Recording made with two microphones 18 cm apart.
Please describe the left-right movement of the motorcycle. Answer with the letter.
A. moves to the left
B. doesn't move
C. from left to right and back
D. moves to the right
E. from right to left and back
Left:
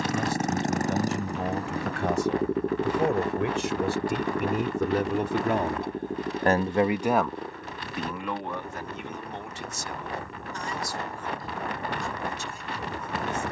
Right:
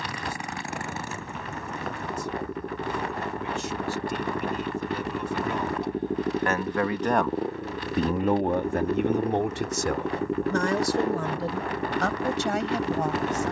D.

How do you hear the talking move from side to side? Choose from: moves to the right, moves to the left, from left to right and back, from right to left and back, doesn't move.
moves to the right.